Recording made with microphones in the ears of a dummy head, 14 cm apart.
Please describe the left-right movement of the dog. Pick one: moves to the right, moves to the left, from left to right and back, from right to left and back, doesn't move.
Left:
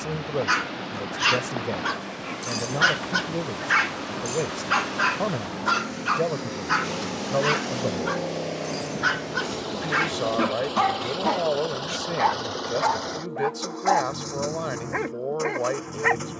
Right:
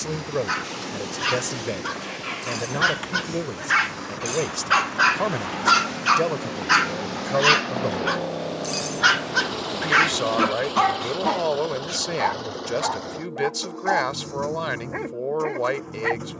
from left to right and back.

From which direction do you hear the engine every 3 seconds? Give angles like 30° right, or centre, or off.
80° right, 70° right, 50° right, 10° right, 30° left, 50° left.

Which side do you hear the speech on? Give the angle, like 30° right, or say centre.
50° right.